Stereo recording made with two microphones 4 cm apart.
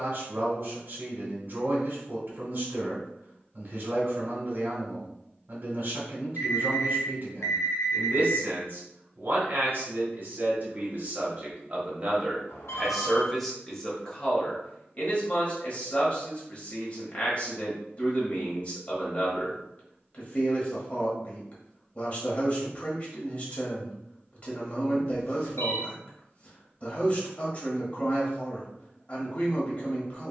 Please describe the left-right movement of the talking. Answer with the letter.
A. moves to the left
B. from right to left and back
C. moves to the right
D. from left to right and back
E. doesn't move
A.